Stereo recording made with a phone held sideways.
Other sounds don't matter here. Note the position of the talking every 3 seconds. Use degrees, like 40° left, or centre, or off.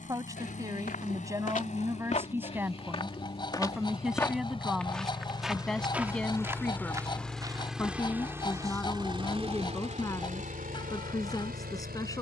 20° right, centre, 10° left, 20° left.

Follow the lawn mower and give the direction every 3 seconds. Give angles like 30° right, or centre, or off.
50° left, 30° left, centre, 50° right.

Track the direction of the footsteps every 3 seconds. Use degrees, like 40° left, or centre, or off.
50° left, 10° left, 20° right, off.